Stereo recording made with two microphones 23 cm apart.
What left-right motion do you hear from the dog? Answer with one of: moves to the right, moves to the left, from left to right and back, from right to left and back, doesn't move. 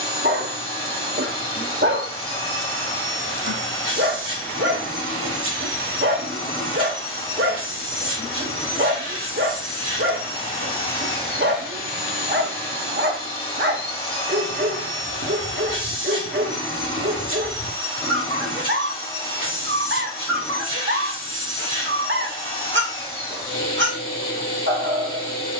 doesn't move.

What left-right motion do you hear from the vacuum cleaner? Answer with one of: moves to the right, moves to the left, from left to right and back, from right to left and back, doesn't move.
doesn't move.